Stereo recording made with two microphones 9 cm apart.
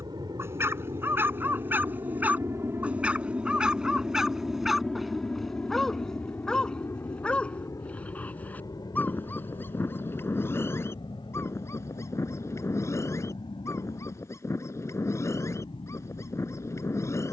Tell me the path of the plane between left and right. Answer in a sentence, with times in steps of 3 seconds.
In this clip you hear the plane on the right from 0 s, in the centre from 3 s and on the left from 6 s.